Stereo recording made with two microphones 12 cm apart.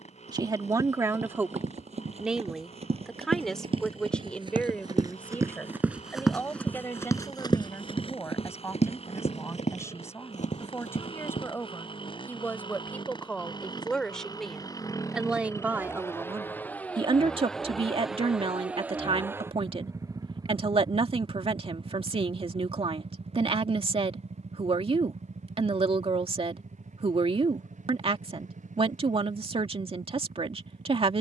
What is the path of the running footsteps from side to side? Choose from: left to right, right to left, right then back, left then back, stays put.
right to left.